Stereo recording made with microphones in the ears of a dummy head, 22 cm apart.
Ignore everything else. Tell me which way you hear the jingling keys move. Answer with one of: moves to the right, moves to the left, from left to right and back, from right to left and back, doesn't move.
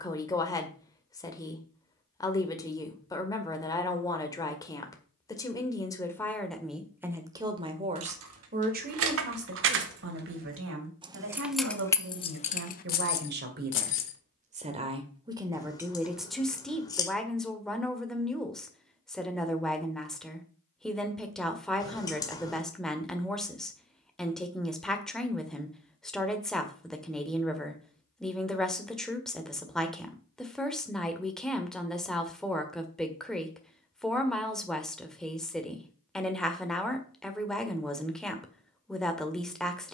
moves to the left.